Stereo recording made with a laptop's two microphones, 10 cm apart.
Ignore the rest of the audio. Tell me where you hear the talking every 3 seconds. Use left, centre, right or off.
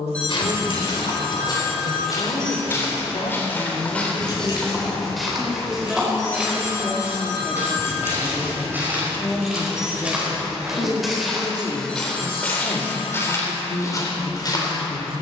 left, left, centre, left, left.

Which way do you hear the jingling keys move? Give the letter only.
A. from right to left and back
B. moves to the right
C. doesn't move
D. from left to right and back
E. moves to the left
A.